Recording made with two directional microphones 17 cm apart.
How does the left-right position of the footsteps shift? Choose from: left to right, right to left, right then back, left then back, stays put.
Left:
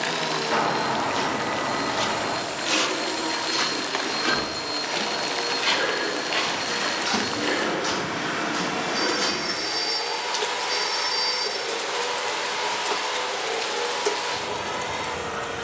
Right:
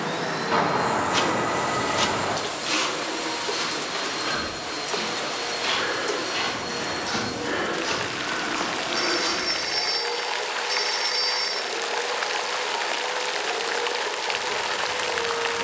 right to left.